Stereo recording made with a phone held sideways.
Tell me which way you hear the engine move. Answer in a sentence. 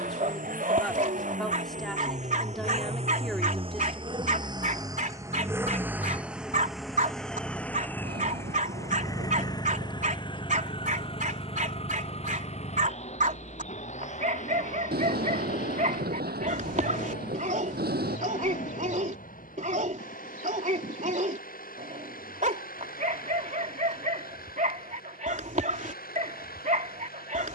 In this clip you hear the engine travel towards the left.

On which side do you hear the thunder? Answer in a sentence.
You can hear the thunder on the right.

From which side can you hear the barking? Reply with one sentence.
You can hear the barking on the right.